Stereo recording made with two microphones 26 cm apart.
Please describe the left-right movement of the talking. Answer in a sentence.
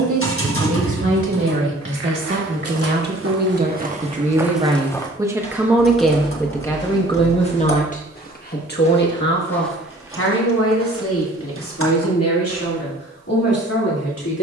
In this clip you hear the talking move from right to left.